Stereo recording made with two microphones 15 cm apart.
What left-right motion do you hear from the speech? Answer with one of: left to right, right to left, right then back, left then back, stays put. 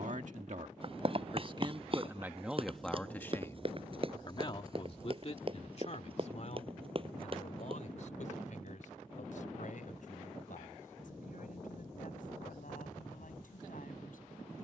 right to left.